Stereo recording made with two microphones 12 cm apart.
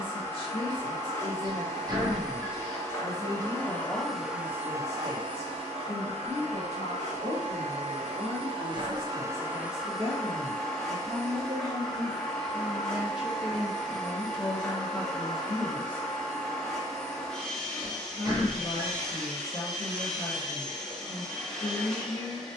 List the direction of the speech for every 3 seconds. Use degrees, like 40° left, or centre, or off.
20° left, 50° right, 60° right, 40° right, centre, 30° left, 40° left, 40° left.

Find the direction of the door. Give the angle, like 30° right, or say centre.
30° right.